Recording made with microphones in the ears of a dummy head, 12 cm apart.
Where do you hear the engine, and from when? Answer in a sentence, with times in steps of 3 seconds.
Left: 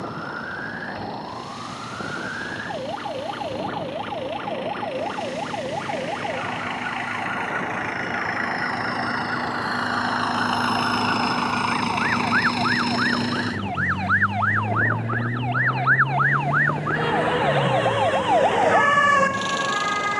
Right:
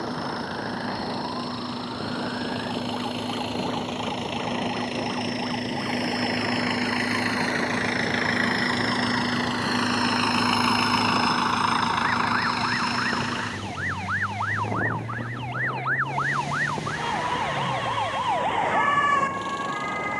In this clip you hear the engine on the right from 0 s, in the centre from 9 s and on the left from 12 s.